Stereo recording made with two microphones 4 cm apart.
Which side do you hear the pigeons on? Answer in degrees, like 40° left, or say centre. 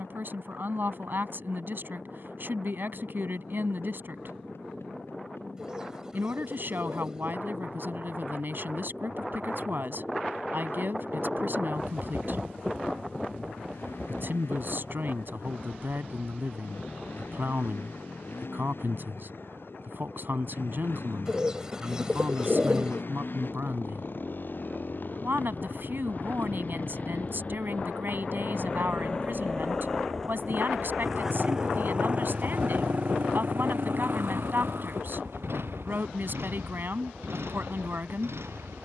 20° right.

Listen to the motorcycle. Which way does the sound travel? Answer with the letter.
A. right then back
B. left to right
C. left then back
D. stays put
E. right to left
B.